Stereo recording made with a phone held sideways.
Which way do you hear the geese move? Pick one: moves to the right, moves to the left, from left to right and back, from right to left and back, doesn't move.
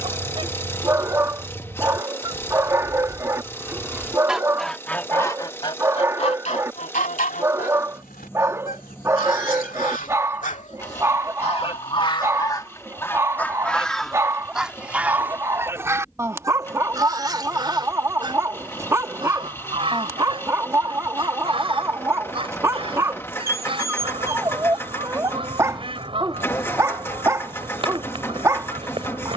from right to left and back.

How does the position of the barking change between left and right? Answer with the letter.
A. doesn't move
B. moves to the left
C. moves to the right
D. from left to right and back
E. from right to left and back
A.